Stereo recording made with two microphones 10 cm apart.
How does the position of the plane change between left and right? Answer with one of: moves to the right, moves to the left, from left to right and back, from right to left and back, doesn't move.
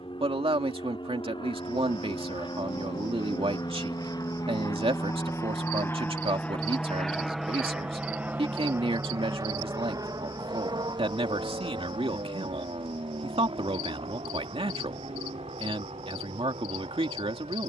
moves to the right.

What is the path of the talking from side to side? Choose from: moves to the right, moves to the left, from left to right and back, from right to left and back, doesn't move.
doesn't move.